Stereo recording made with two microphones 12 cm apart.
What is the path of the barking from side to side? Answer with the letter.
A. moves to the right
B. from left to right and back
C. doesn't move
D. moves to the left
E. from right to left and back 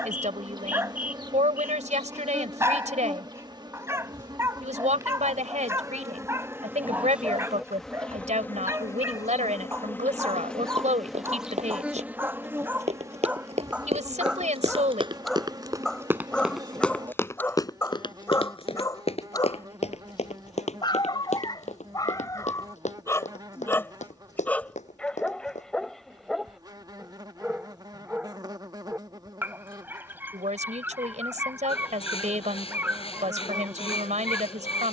E.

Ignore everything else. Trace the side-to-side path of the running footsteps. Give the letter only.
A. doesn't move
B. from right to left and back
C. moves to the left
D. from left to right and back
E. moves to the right
C.